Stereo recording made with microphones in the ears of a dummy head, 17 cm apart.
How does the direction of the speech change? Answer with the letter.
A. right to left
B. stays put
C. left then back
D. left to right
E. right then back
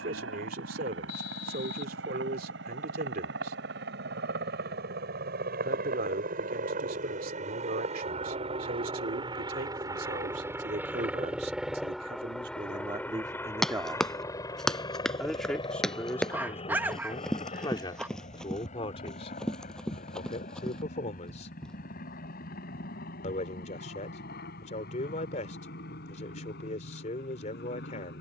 A.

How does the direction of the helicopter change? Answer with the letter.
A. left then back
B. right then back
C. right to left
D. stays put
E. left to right
C.